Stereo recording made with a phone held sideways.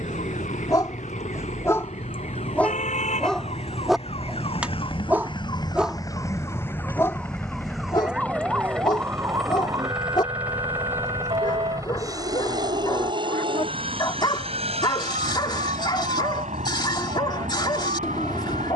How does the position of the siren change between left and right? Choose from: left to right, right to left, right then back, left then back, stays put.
left to right.